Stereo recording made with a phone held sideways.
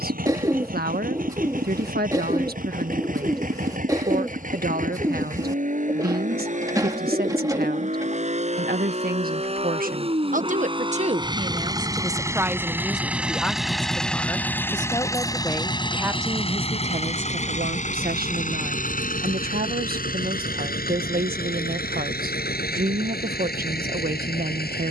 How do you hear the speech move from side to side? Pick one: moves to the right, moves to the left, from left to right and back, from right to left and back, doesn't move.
from right to left and back.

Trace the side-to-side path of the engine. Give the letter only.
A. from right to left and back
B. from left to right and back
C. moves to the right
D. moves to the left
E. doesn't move
D.